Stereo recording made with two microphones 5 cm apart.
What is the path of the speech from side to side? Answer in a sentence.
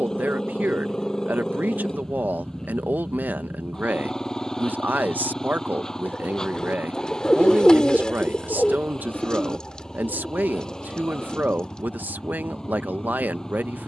You can hear the speech stay in one place.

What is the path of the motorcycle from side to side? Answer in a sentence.
In this clip you hear the motorcycle stay put.